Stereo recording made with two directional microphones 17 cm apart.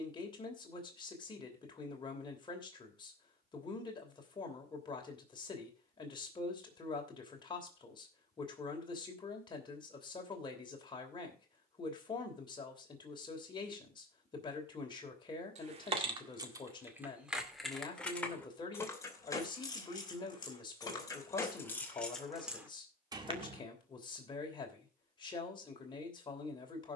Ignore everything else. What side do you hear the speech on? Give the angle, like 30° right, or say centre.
30° left.